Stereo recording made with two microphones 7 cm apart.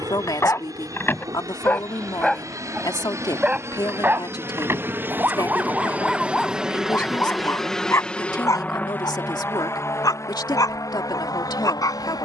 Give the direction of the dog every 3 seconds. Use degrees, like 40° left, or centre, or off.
20° left, 20° right, 20° left, 50° left.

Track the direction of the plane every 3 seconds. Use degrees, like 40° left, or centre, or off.
50° right, 40° right, centre, 40° left.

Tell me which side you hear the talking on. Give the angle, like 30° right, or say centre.
70° left.